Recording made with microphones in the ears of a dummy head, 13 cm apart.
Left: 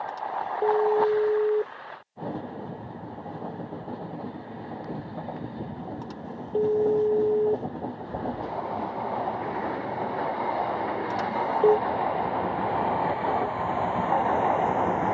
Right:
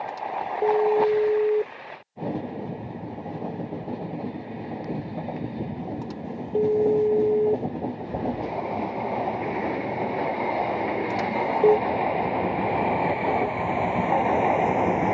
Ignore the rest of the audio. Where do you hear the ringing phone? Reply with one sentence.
You can hear the ringing phone in the centre.